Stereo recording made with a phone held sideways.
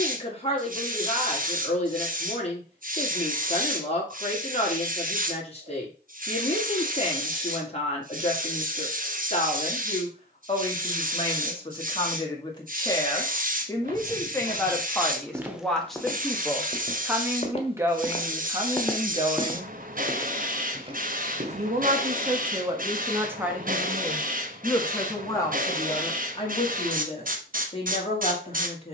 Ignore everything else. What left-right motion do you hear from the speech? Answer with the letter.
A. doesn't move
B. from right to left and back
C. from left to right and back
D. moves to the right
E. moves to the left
C.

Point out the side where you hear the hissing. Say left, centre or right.
right.